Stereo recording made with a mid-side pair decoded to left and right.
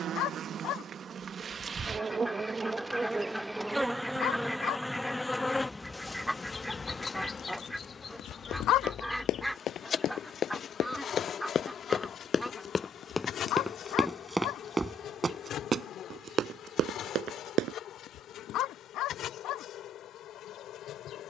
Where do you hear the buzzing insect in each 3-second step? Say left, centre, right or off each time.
right, centre, left, left, left, left, left.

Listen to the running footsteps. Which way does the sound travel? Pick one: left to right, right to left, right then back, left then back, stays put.
left to right.